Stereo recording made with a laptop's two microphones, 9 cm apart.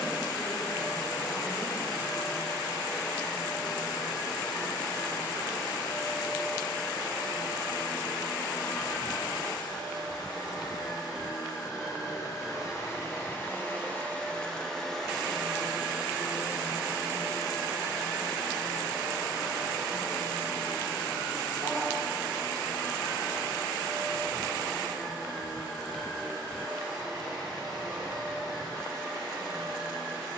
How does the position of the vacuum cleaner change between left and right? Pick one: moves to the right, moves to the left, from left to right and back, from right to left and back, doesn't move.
moves to the right.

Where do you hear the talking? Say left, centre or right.
centre.